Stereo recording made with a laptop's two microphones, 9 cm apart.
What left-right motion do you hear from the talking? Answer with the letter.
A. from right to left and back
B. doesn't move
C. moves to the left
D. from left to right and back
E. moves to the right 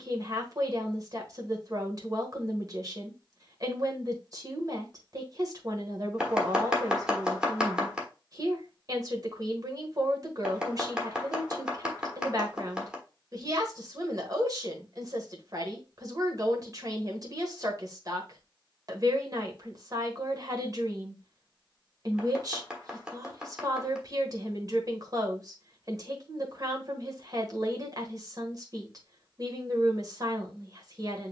B.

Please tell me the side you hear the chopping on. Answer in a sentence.
You can hear the chopping in the centre.